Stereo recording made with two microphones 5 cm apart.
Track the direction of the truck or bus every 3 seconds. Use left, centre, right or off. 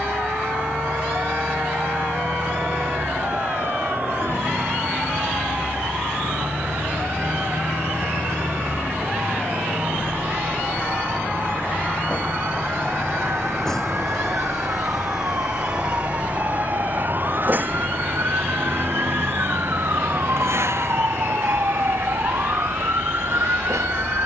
left, left, left, left, centre, right, right, right.